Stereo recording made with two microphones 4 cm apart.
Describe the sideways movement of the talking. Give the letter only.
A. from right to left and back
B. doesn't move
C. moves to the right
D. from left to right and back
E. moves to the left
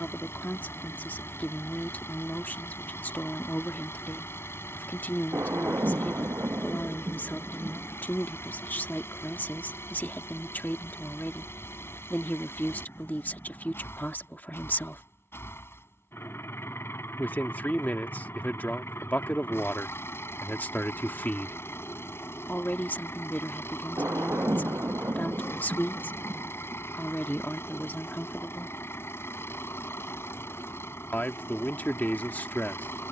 B.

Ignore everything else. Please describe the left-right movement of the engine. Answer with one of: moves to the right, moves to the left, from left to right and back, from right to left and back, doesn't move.
doesn't move.